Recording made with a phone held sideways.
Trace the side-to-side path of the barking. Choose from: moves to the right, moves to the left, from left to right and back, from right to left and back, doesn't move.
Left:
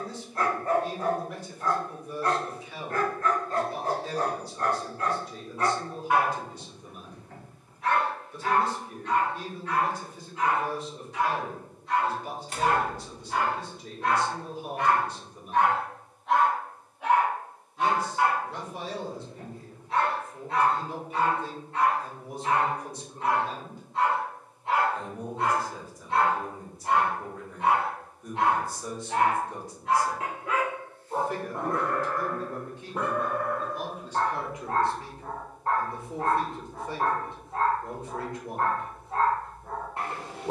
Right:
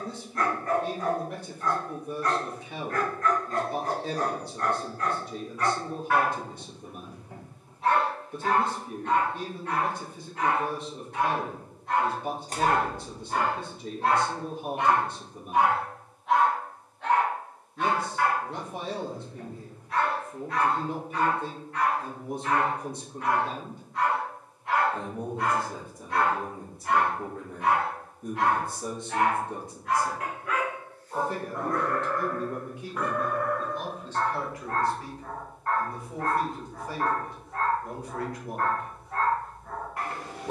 from left to right and back.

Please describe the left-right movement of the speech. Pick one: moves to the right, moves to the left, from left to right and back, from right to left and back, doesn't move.
moves to the left.